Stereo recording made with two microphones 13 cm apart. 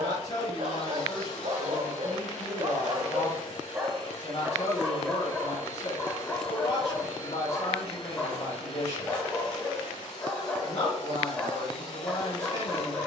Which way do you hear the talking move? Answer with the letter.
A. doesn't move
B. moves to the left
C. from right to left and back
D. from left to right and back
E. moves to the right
A.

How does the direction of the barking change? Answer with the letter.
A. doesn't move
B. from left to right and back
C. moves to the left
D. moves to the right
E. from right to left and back
C.